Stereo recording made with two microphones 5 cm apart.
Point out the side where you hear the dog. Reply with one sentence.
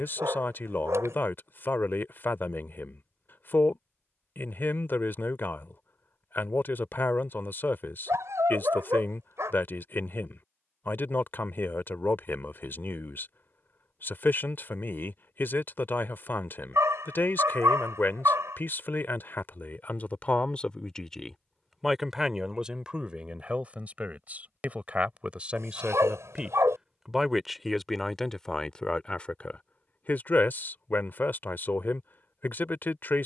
In this clip you hear the dog on the right.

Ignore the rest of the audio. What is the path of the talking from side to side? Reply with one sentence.
You can hear the talking move from left to right and back again.